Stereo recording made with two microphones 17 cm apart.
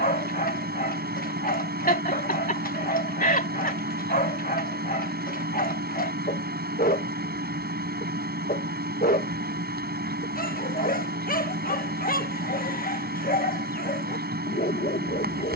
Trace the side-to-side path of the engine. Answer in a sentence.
In this clip you hear the engine stay put.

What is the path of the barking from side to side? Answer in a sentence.
In this clip you hear the barking stay in one place.